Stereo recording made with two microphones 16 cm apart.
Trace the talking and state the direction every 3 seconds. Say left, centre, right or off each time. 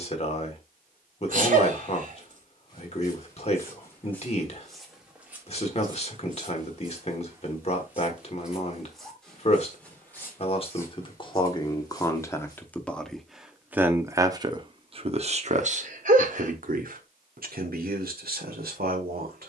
left, left, left, left, centre, right, right.